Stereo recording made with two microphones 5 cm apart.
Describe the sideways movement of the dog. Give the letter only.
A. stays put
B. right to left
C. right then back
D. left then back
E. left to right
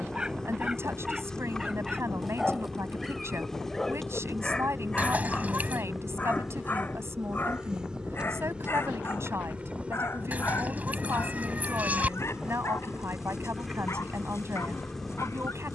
B.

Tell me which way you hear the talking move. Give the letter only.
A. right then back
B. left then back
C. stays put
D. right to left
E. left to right
C.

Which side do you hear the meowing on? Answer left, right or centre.
right.